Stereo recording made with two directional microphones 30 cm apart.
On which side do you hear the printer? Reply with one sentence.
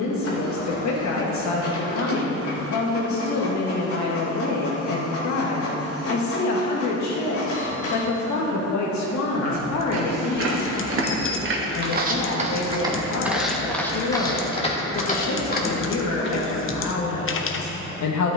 You can hear the printer on the left.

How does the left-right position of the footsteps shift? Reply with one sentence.
You can hear the footsteps travel towards the left.